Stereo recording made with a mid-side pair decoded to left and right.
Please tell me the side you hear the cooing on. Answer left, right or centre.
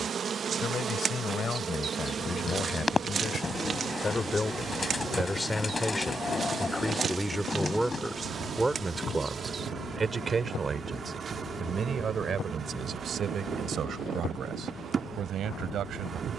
left.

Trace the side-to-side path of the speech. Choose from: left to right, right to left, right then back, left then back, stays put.
left to right.